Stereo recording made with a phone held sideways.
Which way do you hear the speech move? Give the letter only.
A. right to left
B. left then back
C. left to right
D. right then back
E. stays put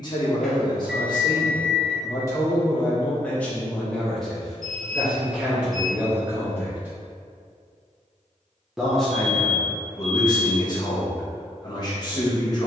D.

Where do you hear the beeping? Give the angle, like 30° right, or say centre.
centre.